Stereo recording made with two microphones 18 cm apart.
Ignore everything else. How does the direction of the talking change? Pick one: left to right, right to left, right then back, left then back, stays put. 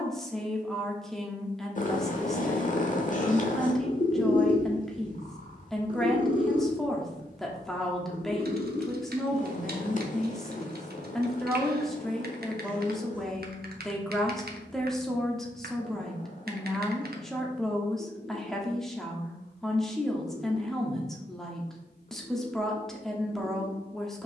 stays put.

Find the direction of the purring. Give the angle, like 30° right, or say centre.
40° left.